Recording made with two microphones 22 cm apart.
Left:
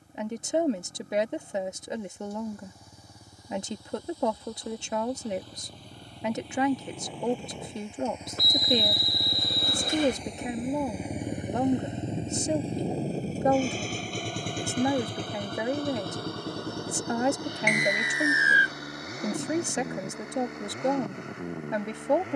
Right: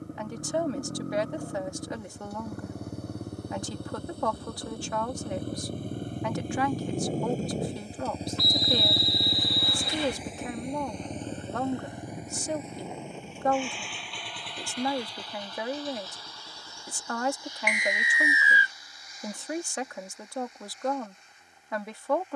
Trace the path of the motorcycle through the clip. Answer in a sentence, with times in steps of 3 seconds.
In this clip you hear the motorcycle on the right from 0 s, in the centre from 9 s and on the left from 12 s.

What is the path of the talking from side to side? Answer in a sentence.
You can hear the talking stay in one place.